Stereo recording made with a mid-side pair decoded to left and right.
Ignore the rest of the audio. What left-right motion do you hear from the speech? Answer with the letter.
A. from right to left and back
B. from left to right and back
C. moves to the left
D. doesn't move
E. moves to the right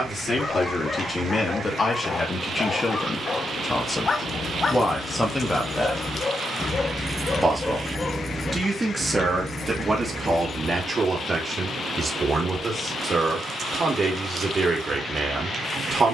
E.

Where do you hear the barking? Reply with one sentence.
In this clip you hear the barking on the left.